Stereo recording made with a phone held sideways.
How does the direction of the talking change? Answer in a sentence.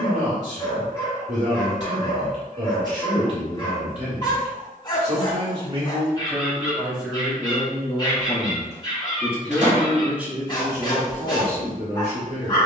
You can hear the talking move from right to left and back again.